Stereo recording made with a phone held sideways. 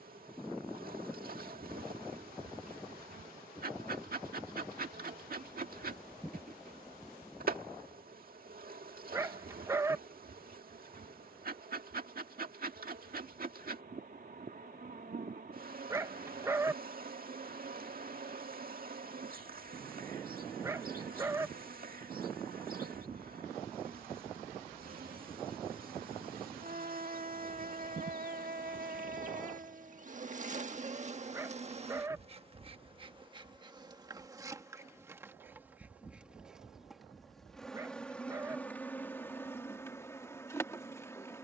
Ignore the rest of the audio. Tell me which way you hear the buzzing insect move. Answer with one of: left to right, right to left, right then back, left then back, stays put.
right to left.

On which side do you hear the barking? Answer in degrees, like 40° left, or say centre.
20° right.